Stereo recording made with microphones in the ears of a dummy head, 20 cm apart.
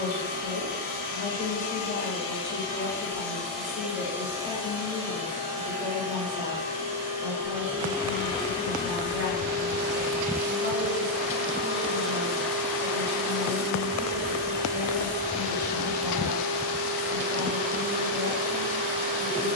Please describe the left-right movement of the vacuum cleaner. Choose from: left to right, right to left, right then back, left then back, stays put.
right then back.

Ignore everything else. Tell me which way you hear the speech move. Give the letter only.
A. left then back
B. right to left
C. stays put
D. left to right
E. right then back
D.